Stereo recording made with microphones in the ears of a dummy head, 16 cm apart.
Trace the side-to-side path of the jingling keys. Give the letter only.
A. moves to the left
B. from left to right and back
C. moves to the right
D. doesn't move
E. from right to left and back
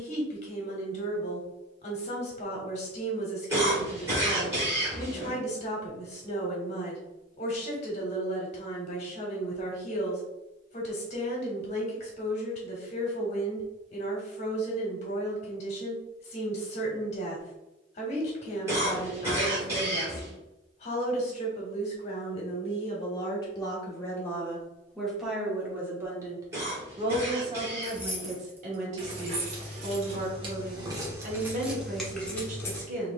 B.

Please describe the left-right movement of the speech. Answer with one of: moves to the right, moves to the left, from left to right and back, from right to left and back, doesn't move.
moves to the right.